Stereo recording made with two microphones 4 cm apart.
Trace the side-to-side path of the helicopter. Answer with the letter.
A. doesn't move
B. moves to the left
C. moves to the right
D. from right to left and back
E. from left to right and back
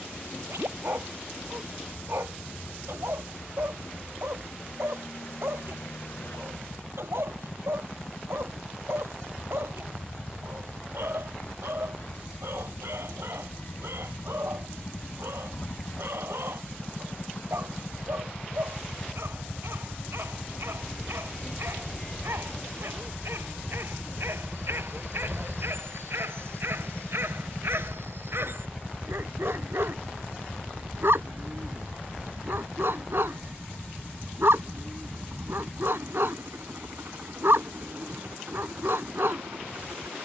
C.